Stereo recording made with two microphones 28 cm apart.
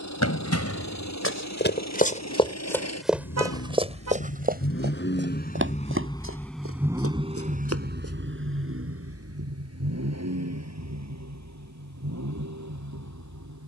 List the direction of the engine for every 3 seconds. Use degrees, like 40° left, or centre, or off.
70° left, 50° left, 20° right, 60° right, 70° right.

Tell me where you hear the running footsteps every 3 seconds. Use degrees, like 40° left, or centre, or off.
40° left, 30° right, 50° right, off, off.